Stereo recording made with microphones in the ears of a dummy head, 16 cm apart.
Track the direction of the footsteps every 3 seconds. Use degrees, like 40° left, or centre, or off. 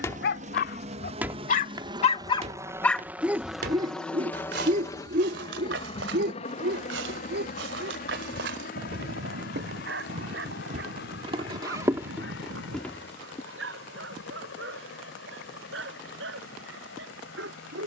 20° right, 60° right, 70° right, 40° right, centre, off.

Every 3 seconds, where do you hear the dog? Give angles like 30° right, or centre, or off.
50° left, 40° right, 70° right, 70° right, 80° right, 80° right.